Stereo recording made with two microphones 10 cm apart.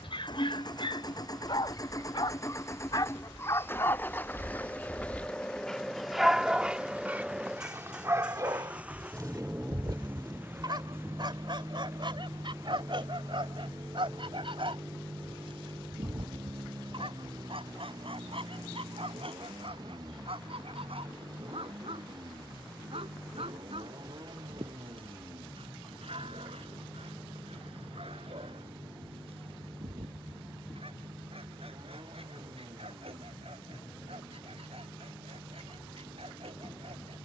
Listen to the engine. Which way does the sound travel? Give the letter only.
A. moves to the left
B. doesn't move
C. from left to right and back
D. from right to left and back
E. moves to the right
E.